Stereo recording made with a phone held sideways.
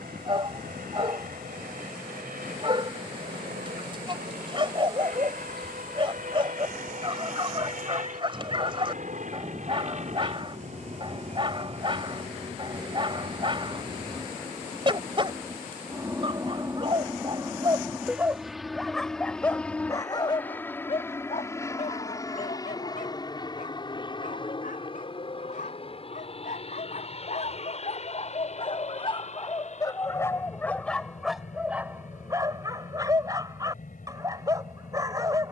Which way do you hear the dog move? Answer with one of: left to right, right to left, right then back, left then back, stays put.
left then back.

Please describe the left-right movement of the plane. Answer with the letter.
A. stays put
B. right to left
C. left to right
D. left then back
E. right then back
B.